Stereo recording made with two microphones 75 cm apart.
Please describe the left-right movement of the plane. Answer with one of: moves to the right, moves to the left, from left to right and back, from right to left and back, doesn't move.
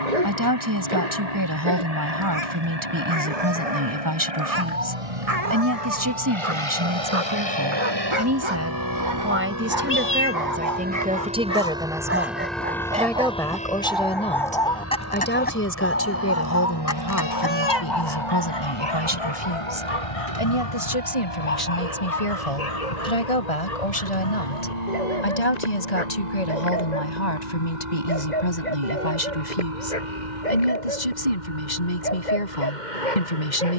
moves to the left.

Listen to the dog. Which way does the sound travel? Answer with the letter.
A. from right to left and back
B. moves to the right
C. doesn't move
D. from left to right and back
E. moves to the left
E.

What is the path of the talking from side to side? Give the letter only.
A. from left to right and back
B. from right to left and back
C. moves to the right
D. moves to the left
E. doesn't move
D.